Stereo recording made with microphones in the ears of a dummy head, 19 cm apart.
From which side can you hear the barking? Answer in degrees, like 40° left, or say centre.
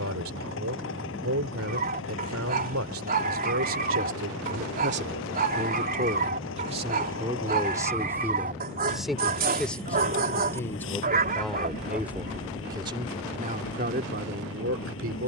50° right.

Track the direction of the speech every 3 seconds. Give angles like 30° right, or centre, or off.
70° right, 60° right, 20° right, centre, 40° right.